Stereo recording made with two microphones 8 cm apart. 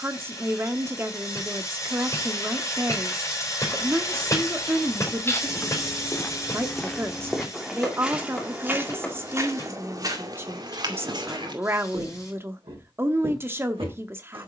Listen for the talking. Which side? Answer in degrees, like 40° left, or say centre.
30° right.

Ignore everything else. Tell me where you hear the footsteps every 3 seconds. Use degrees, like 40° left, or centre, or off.
off, 30° left, centre, 50° right, 70° right.